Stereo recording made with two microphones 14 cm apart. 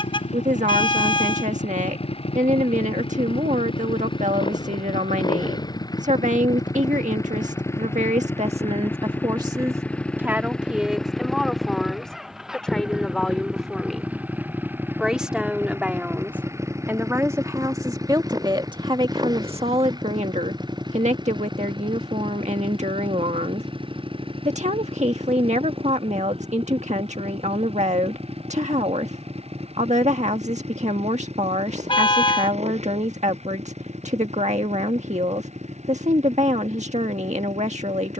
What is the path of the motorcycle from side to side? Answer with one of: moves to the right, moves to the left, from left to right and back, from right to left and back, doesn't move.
moves to the right.